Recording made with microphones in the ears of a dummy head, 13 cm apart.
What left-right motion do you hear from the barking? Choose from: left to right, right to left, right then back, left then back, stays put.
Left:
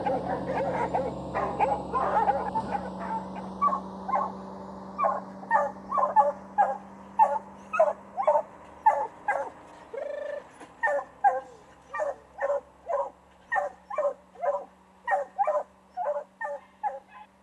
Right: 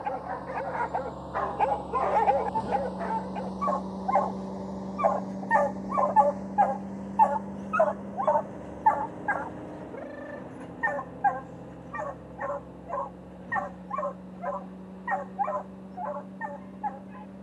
right then back.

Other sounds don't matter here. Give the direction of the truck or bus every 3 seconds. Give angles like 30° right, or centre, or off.
20° left, 20° right, 40° right, 50° right, 50° right, 60° right.